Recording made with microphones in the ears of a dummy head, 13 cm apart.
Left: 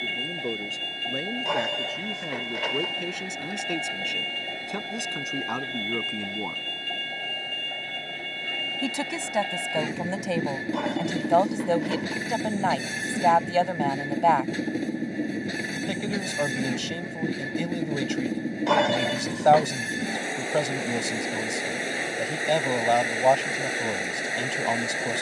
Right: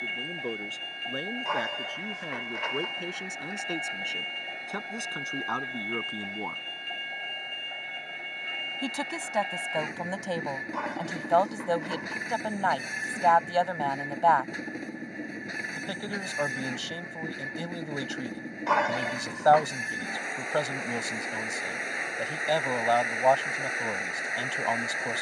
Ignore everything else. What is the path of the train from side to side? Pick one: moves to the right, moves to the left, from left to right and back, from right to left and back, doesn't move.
doesn't move.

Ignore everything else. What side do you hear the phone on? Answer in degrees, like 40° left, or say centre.
40° left.